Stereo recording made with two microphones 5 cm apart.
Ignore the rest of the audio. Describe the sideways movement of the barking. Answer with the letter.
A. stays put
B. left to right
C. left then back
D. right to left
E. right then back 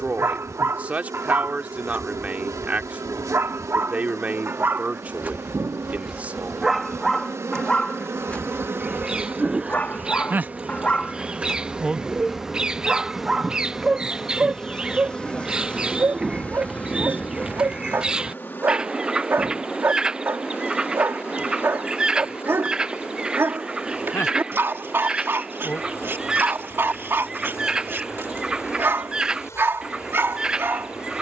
C.